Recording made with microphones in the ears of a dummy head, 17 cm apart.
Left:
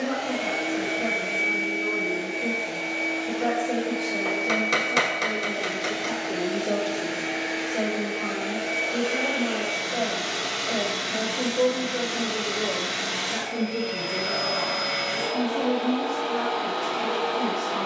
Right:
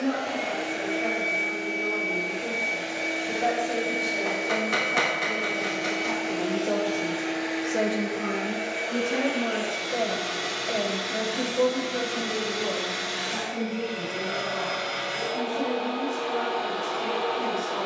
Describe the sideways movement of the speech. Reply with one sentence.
In this clip you hear the speech move from left to right and back again.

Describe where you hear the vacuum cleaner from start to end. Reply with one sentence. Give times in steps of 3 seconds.
In this clip you hear the vacuum cleaner on the left from 0 s, in the centre from 3 s and on the left from 6 s.